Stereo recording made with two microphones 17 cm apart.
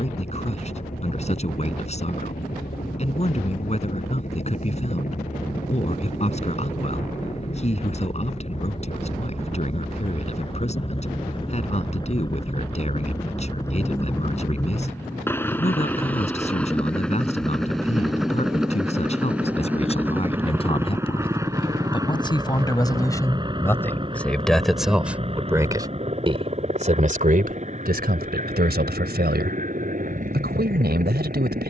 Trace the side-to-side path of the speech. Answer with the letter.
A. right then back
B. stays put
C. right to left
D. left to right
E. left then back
D.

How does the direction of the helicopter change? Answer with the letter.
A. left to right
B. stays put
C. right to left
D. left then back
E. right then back
A.